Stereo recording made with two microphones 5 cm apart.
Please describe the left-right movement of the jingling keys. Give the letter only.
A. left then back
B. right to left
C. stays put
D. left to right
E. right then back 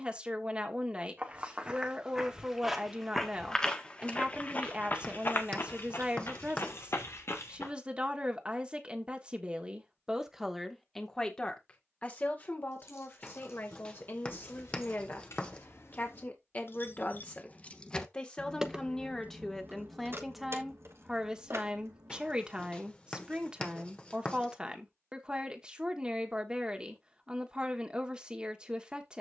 D.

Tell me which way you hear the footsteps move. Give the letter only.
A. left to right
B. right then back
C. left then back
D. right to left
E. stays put
D.